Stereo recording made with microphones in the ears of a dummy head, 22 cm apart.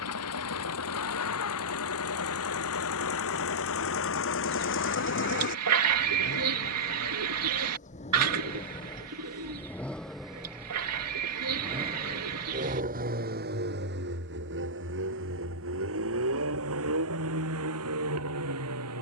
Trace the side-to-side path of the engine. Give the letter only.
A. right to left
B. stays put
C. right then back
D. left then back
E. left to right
E.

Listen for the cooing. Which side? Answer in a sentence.
You can hear the cooing on the right.